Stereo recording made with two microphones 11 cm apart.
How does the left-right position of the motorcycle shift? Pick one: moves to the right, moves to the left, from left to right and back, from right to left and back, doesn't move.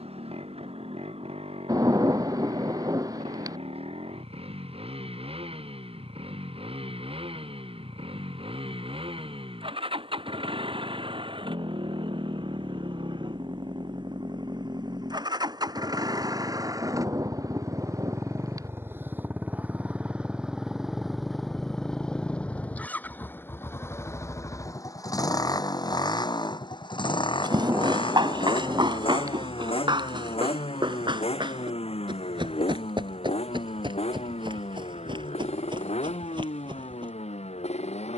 moves to the left.